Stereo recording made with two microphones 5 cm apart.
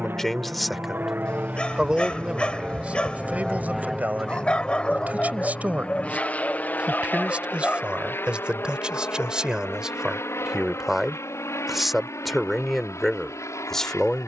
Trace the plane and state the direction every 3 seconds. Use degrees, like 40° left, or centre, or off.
30° right, 10° left, 40° left, 50° left, 60° left.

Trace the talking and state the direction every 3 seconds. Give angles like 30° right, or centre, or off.
10° right, 30° right, 20° right, 10° right, 10° left.